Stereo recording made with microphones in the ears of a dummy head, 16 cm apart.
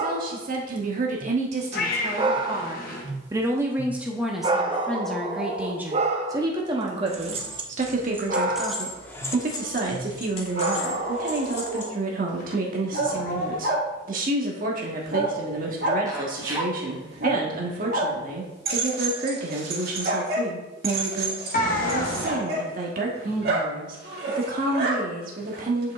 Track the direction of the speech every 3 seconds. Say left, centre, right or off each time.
right, centre, right, right, right, right, right, right, right.